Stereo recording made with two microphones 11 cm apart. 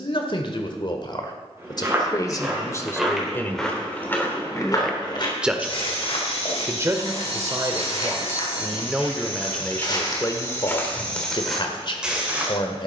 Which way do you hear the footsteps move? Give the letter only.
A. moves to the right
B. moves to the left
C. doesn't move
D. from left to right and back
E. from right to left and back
E.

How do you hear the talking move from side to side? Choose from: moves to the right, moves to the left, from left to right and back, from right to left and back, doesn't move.
from left to right and back.